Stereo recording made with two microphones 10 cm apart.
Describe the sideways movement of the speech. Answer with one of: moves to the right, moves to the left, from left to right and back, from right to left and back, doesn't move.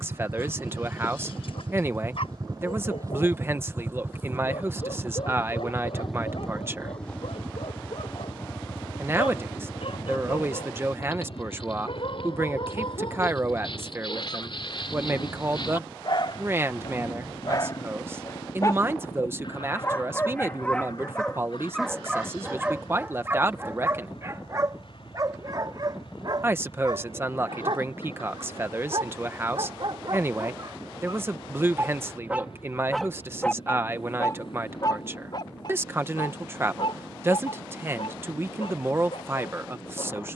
doesn't move.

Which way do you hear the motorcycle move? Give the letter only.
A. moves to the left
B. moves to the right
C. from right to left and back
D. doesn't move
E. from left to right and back
A.